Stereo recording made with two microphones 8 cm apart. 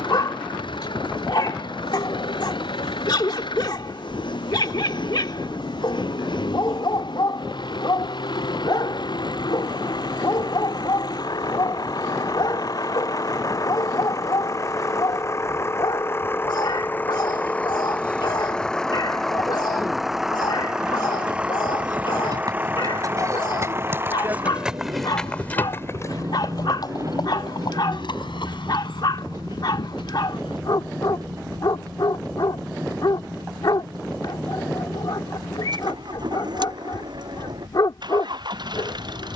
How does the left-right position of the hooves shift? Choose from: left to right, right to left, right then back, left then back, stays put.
right to left.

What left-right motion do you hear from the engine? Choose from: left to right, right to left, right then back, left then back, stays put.
left to right.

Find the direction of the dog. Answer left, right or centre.
left.